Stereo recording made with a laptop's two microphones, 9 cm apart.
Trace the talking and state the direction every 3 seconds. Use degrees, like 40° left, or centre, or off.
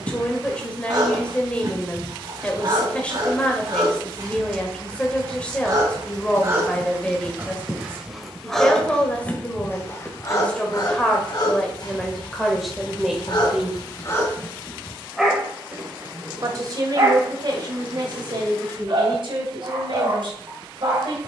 10° left, 10° left, 10° left, 10° left, centre, 40° right, 60° right.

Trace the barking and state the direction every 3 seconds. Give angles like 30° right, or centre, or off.
40° right, 40° right, 10° right, 40° left, 40° left, 30° right, 40° right.